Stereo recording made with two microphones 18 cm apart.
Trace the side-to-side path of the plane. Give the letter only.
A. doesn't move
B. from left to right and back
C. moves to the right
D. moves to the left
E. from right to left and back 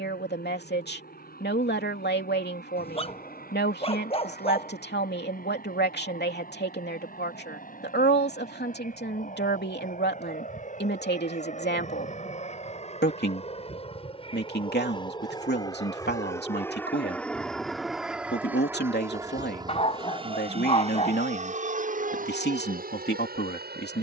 C.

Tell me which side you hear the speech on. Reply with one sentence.
In this clip you hear the speech on the left.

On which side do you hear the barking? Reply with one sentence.
You can hear the barking on the left.